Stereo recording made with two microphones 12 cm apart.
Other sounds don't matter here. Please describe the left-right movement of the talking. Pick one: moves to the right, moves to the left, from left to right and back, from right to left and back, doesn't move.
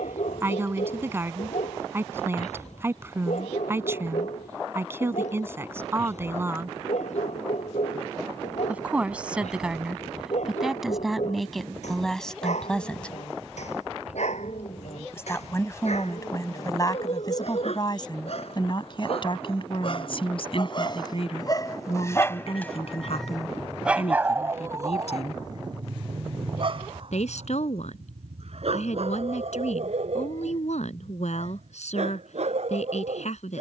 moves to the left.